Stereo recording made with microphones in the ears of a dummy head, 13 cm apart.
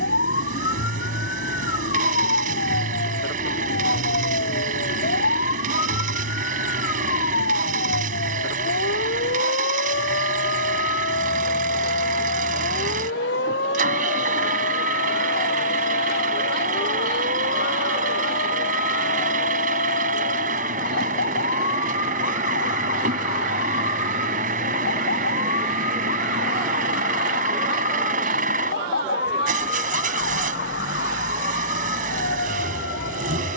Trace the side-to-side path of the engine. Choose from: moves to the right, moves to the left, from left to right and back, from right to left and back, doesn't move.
doesn't move.